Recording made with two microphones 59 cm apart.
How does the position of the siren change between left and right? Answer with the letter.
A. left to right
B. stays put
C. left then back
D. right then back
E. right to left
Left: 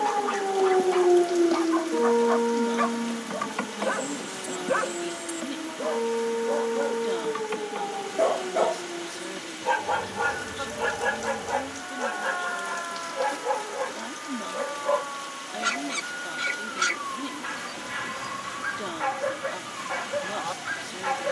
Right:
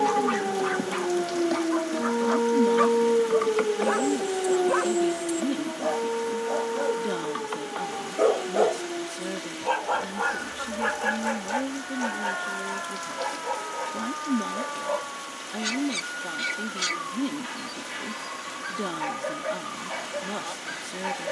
E.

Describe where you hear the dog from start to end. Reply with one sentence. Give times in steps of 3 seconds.
In this clip you hear the dog on the right from 0 s, in the centre from 6 s and on the left from 9 s.